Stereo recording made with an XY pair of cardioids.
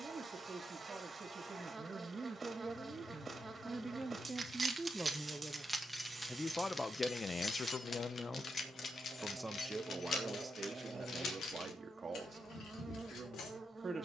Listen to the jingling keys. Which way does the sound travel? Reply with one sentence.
In this clip you hear the jingling keys travel towards the left.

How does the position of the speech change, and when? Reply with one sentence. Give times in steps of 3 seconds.
You can hear the speech on the right from 0 s, in the centre from 3 s, on the left from 6 s and on the right from 9 s.